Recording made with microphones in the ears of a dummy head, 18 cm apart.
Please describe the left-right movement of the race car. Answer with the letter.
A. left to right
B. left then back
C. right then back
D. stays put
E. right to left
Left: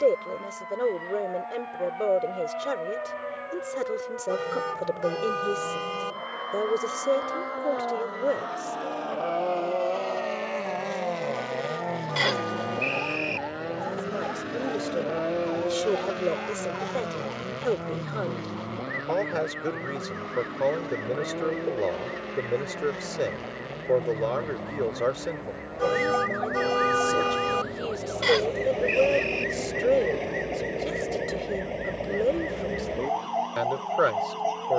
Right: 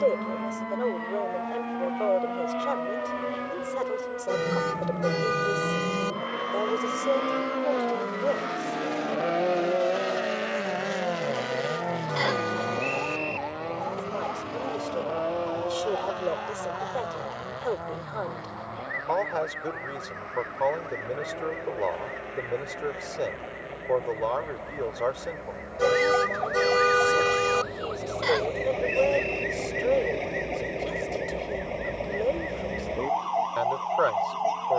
E.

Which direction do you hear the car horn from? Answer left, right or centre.
right.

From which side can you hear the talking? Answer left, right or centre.
left.